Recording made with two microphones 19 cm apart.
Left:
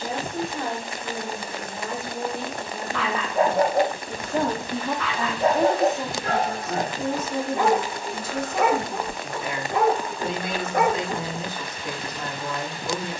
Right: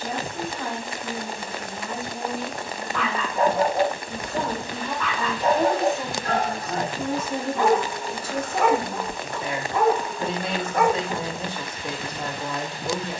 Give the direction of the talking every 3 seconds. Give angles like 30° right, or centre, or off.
70° left, 40° left, 10° right, 30° right, 30° right.